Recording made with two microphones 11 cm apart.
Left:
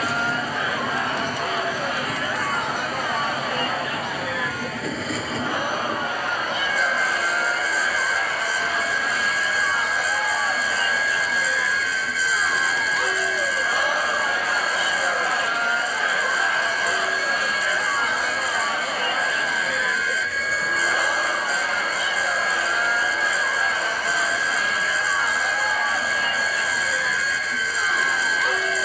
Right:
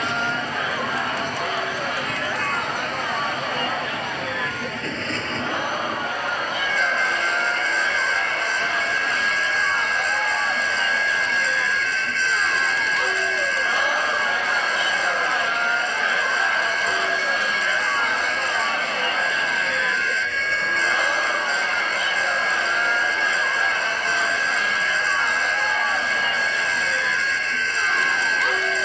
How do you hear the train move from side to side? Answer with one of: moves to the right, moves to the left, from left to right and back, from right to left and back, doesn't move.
doesn't move.